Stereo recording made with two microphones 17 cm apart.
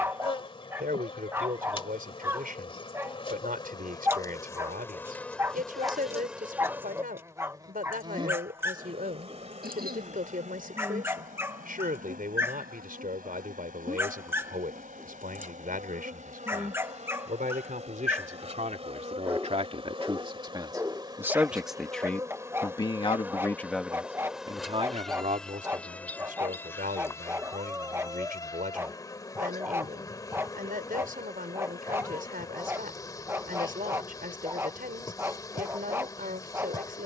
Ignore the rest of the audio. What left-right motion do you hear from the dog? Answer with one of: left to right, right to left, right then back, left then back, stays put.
stays put.